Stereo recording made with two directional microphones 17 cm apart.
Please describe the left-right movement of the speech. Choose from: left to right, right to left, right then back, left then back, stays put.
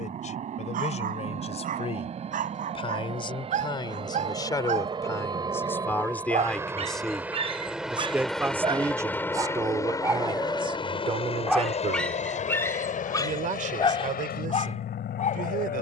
left to right.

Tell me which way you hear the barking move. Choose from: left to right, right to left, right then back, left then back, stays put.
right to left.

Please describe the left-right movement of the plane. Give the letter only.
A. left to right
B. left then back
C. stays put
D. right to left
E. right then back
D.